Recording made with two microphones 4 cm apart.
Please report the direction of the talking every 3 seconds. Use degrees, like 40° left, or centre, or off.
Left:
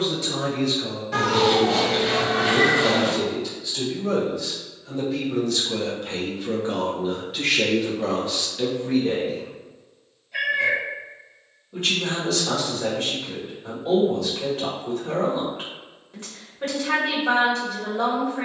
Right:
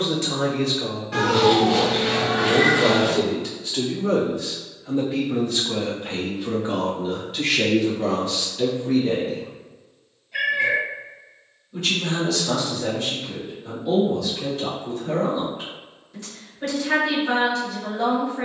60° right, 30° right, 10° left, 30° left, 40° left, 40° left.